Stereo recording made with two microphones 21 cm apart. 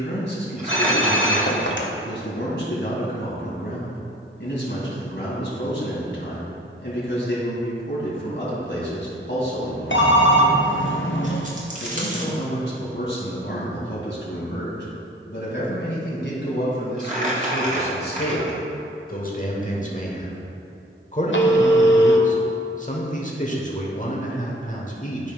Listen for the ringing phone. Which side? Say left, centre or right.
left.